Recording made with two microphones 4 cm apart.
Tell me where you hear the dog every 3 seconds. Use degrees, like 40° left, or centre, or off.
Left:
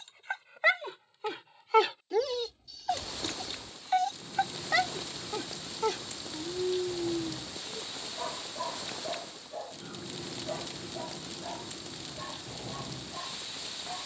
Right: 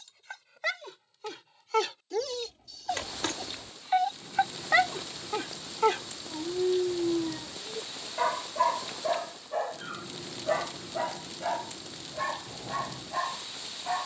20° left, 20° right, 50° right, 70° right, 80° right.